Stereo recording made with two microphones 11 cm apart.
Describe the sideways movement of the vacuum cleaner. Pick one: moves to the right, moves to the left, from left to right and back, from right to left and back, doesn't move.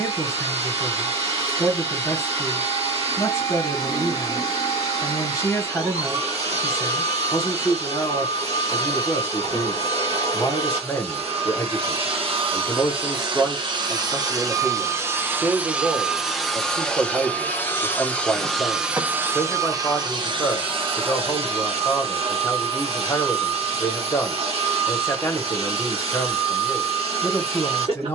from right to left and back.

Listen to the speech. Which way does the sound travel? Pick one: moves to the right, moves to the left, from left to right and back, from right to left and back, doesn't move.
from left to right and back.